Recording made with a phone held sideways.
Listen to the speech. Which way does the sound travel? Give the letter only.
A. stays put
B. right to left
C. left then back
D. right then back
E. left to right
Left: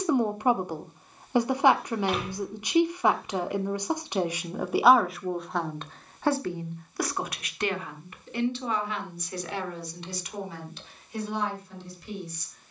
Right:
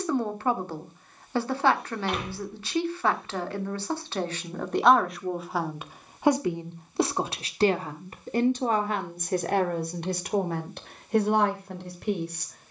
E.